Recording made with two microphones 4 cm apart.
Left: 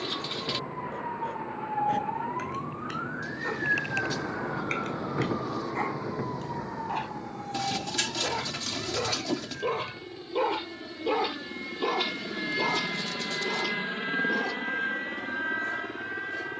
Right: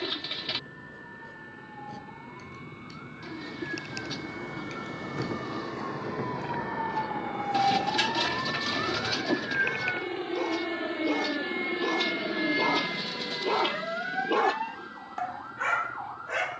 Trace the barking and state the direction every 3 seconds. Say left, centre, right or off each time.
left, left, left, left, right, right.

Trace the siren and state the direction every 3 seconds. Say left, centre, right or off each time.
left, left, right, right, right, right.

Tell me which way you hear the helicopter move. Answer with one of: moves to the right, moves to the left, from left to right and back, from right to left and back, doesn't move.
moves to the left.